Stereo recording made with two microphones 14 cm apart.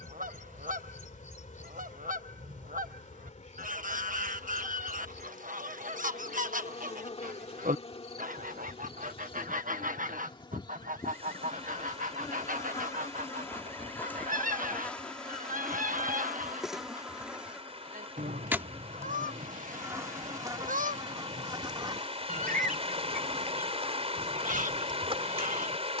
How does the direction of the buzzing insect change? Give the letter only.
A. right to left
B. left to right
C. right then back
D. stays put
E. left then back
B.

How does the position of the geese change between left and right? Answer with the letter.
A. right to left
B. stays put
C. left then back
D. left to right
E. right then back
B.